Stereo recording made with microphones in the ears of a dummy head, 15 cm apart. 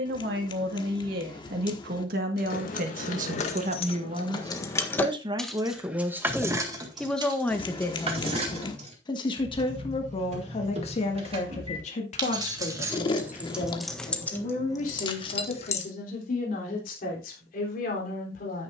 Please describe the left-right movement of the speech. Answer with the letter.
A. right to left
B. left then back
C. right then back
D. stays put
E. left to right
A.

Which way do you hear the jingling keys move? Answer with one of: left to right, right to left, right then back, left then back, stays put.
right then back.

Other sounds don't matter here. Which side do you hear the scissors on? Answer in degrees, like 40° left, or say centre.
30° left.